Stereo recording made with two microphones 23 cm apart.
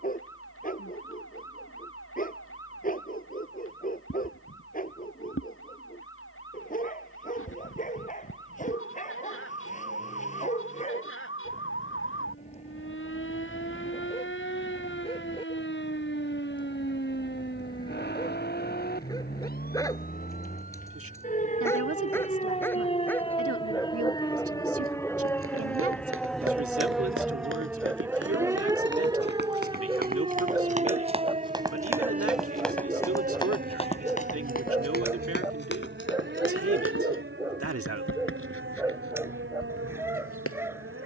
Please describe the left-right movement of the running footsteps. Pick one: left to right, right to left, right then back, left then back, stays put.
right to left.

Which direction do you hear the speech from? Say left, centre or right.
right.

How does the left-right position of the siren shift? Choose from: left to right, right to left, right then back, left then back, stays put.
left to right.